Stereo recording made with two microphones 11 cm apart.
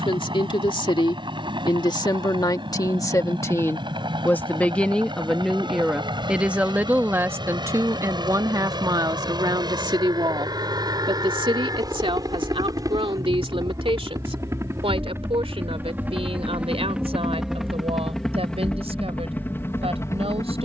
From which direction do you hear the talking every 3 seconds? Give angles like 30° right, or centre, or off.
50° left, 10° left, 20° right, 50° right, 60° right, 70° right, 70° right.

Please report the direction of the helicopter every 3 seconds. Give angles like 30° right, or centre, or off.
50° right, 50° right, 50° right, 40° right, 30° right, 10° right, 20° left.